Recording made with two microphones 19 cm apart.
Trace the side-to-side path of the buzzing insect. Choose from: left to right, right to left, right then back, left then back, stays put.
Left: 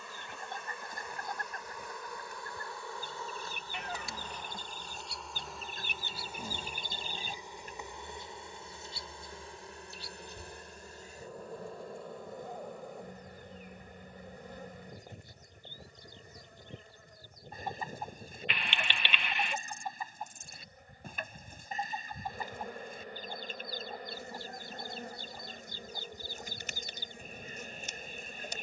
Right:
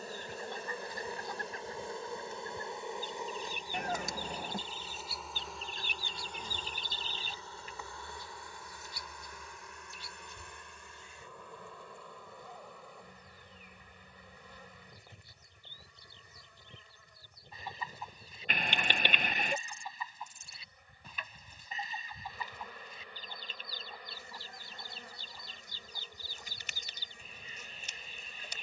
right to left.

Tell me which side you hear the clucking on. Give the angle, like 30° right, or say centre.
50° left.